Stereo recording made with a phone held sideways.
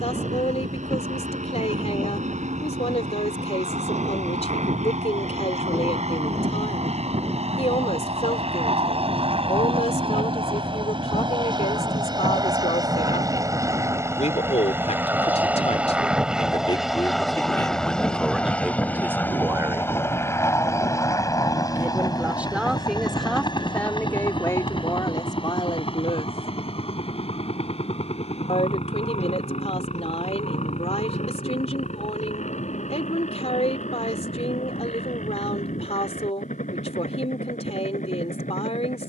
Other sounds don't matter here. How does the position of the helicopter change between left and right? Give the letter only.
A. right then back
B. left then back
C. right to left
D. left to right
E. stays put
C.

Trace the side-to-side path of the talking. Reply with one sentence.
You can hear the talking move from left to right and back again.